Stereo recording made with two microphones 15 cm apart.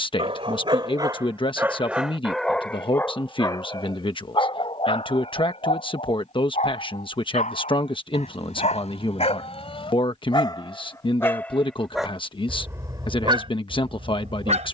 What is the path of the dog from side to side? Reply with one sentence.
You can hear the dog move from right to left and back again.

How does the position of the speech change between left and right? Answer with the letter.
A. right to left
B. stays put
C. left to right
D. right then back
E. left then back
B.